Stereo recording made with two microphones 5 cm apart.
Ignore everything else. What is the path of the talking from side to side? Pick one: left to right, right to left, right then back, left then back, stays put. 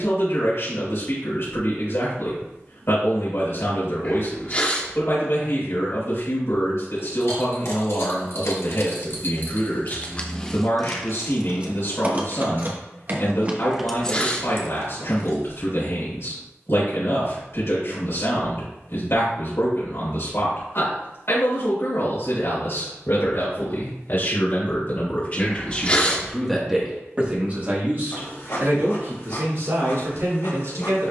left to right.